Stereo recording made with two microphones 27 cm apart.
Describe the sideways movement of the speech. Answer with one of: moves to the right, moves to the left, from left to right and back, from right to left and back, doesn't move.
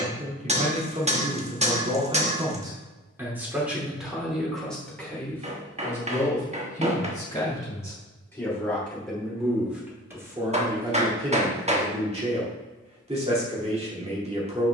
from right to left and back.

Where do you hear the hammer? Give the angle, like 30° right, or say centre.
20° right.